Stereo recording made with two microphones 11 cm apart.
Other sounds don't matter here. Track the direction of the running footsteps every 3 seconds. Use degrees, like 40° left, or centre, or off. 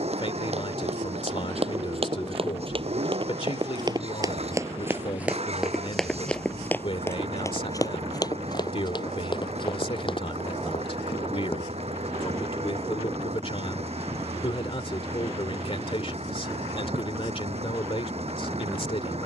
60° right, 30° right, 30° left, 50° left, off, off, off.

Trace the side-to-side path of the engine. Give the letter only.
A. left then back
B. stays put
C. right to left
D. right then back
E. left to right
B.